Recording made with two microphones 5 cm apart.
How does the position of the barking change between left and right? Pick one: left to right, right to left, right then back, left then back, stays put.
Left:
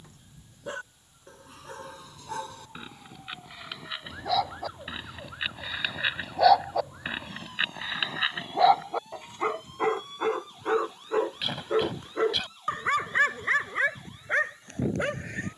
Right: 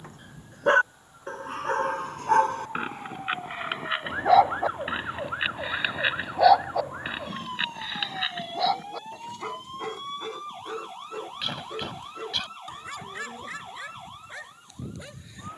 right to left.